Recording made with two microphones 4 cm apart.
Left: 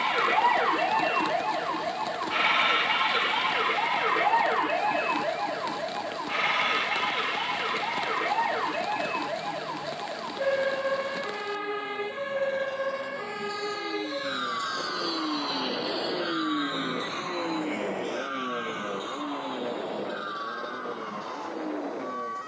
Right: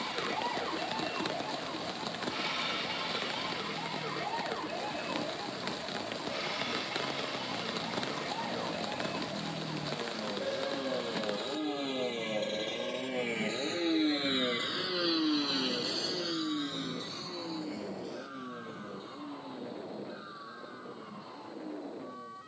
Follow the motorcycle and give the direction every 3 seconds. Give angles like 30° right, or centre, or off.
80° right, 80° right, 80° right, 70° right, 50° right, 30° left, 70° left, 80° left.